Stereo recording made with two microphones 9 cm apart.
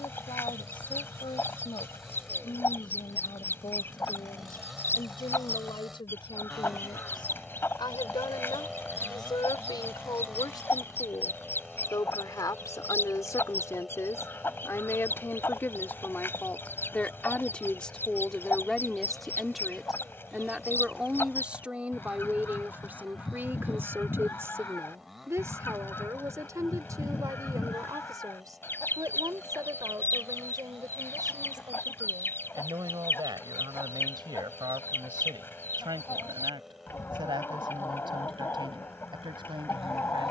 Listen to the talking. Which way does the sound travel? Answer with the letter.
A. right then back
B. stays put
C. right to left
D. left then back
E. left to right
E.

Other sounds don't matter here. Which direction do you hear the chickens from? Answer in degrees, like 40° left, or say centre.
30° left.